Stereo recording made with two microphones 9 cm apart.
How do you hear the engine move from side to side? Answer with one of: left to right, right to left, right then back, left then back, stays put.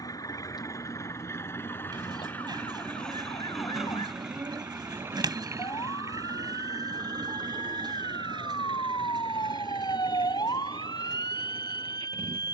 left to right.